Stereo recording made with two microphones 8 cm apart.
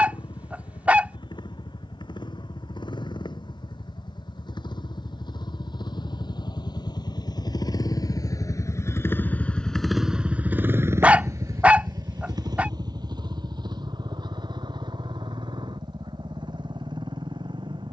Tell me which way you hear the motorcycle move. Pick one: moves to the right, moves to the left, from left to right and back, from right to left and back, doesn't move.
moves to the right.